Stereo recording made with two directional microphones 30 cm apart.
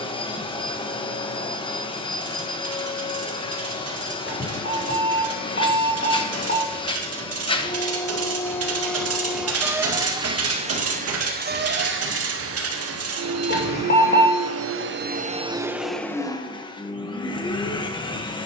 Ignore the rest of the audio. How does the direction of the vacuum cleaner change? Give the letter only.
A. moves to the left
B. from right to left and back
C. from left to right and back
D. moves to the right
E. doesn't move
C.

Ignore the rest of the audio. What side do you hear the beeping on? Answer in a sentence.
In this clip you hear the beeping on the left.